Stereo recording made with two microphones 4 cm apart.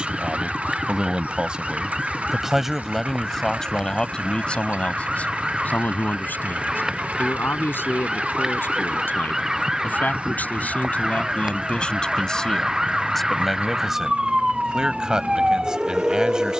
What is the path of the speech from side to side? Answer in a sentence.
In this clip you hear the speech move from right to left and back again.